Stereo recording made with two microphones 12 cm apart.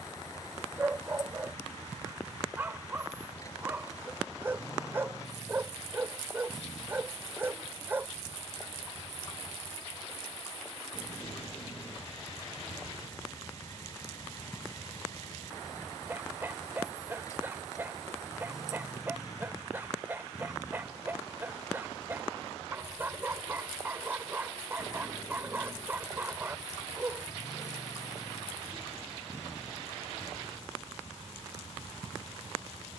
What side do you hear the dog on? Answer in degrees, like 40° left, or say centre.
20° right.